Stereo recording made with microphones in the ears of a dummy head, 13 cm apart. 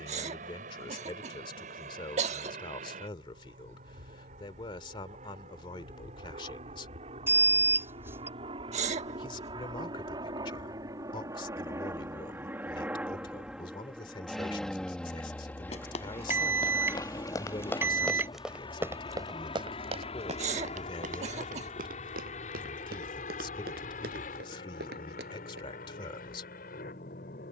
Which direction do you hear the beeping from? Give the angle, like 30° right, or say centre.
20° right.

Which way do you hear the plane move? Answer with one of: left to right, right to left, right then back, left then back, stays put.
right to left.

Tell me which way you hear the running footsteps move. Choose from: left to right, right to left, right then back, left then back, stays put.
left to right.